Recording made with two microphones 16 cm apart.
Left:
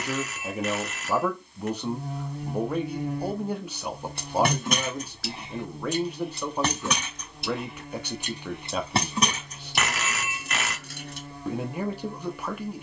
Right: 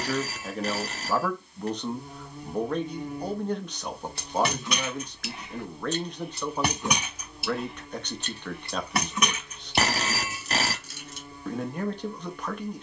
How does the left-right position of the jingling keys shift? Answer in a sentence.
You can hear the jingling keys move from left to right and back again.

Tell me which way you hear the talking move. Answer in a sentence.
In this clip you hear the talking stay in one place.